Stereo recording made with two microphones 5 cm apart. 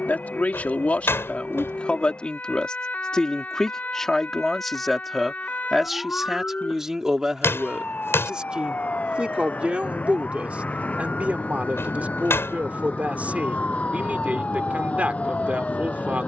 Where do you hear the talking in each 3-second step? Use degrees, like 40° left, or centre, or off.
30° left, 10° left, 10° right, 20° right, 30° right, 30° right.